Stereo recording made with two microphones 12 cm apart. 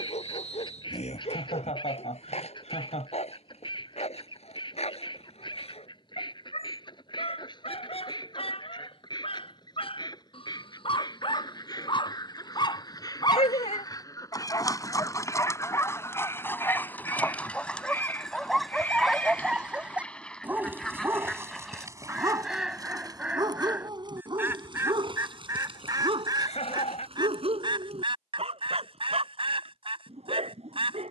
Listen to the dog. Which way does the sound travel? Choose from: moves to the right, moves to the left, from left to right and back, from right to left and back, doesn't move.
moves to the right.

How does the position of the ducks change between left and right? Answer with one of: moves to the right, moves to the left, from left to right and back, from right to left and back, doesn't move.
moves to the right.